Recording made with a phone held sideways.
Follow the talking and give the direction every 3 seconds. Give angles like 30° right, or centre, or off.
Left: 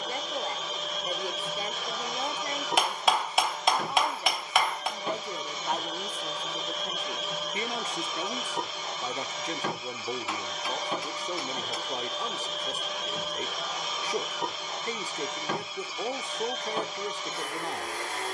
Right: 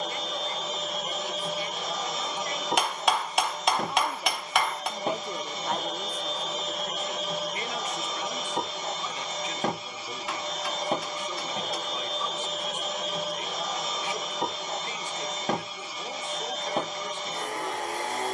40° left, centre, 20° left, 40° left, 40° left, 40° left.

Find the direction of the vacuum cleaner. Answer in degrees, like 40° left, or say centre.
40° right.